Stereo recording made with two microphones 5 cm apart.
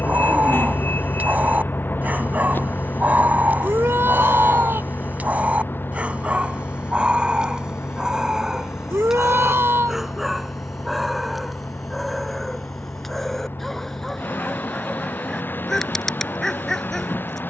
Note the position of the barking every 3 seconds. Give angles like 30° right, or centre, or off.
30° right, 30° right, 20° right, centre, centre, 10° left.